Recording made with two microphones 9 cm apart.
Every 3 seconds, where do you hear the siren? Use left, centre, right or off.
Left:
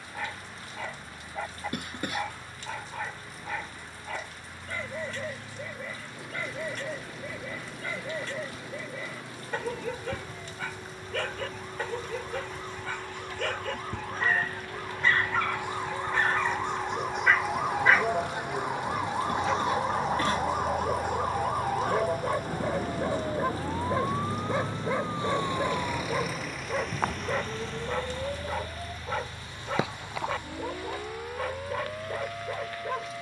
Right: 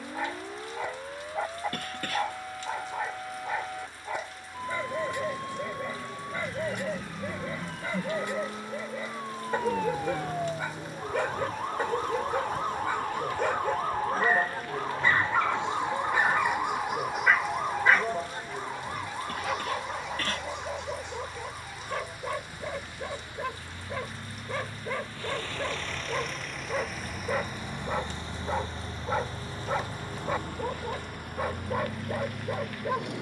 right, right, right, right, right, centre, left, left, left, left, left.